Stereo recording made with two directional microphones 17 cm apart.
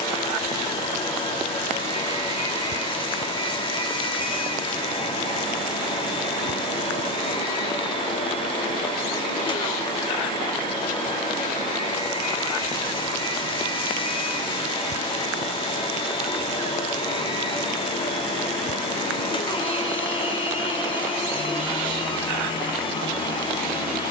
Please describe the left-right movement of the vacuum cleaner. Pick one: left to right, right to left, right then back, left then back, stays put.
stays put.